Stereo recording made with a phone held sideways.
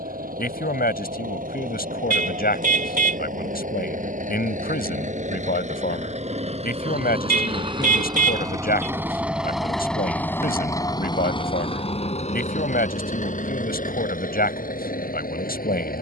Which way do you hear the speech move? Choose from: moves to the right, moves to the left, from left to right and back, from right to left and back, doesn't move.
doesn't move.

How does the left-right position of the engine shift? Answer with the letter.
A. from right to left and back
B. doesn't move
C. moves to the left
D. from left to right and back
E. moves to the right
C.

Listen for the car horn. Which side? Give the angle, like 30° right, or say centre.
60° right.